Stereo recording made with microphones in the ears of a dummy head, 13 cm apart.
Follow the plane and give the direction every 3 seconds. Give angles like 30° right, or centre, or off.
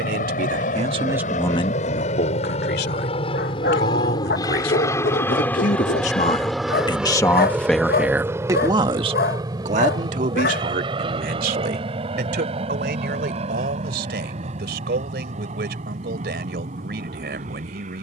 60° left, 30° left, 10° right, 30° right, 40° right, 50° right.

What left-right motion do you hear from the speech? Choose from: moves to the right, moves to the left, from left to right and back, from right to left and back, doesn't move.
from right to left and back.